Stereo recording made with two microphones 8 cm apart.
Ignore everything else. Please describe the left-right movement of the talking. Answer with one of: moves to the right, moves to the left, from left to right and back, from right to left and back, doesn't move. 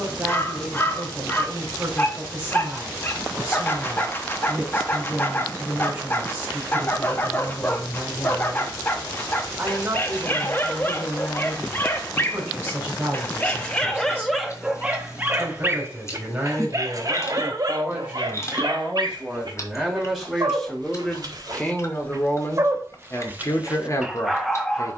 moves to the left.